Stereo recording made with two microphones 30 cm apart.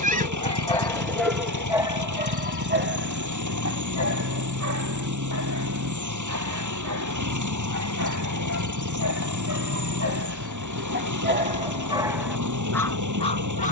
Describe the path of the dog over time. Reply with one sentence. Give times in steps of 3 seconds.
You can hear the dog in the centre from 0 s, on the right from 3 s and in the centre from 12 s.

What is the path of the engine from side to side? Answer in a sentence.
You can hear the engine stay in one place.